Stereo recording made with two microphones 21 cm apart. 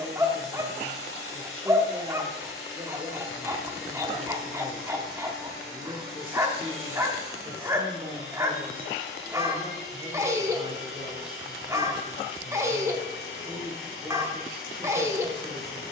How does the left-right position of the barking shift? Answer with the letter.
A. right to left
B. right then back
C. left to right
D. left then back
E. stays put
E.